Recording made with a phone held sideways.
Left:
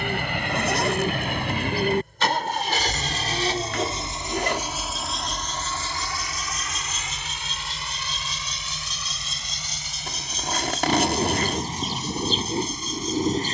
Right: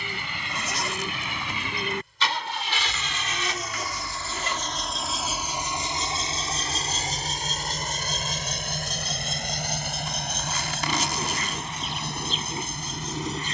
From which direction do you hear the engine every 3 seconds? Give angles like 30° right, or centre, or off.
60° left, 10° left, 50° right, 70° right, 70° right.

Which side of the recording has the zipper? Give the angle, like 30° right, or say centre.
60° left.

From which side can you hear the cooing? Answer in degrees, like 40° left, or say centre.
40° left.